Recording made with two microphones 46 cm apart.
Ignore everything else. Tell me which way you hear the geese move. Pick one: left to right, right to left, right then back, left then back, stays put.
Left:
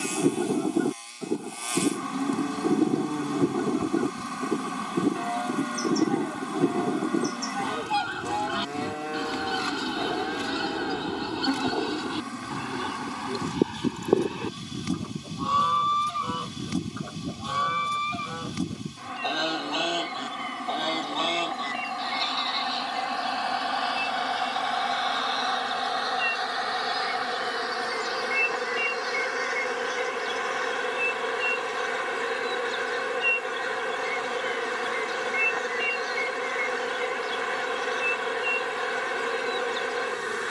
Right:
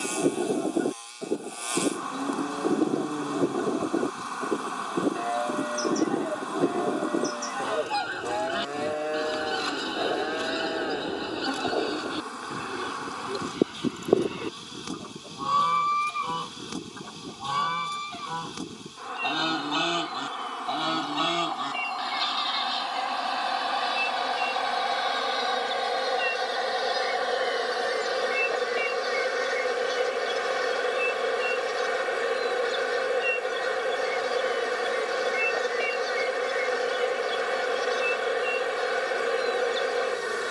left to right.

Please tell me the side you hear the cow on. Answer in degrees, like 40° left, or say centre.
20° left.